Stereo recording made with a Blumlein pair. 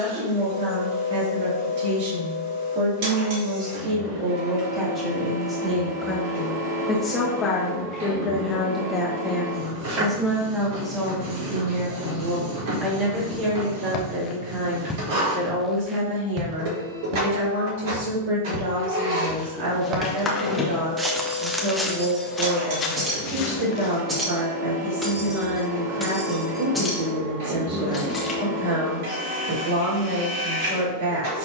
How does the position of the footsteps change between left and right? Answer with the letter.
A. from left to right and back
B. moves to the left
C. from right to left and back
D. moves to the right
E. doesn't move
A.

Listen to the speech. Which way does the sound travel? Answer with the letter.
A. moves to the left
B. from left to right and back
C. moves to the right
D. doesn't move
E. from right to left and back
E.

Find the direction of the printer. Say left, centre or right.
right.